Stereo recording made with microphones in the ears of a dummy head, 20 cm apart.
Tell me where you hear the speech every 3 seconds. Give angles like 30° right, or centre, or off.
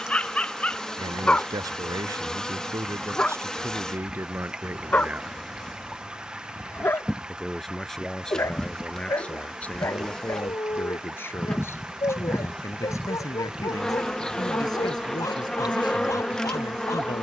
20° right, 10° right, centre, 10° left, 20° left, 20° left.